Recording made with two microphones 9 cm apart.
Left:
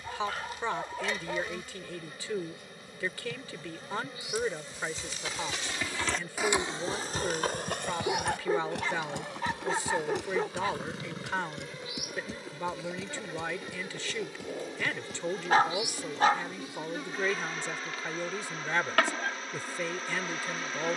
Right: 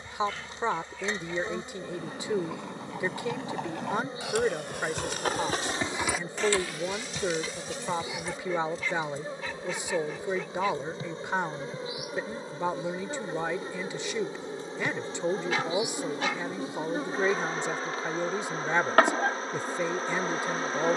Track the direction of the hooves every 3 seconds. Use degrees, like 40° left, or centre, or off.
80° right, 60° right, 40° left, 70° left, 80° left, off, off.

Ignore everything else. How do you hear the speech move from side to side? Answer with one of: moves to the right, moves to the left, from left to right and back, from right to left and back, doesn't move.
doesn't move.